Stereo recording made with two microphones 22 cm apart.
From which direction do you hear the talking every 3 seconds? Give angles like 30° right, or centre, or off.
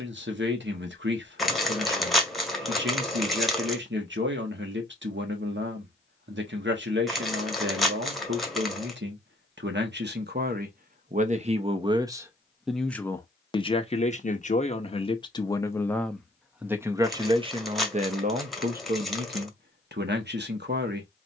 60° right, 60° right, 60° right, 40° right, 20° left, centre, 50° right.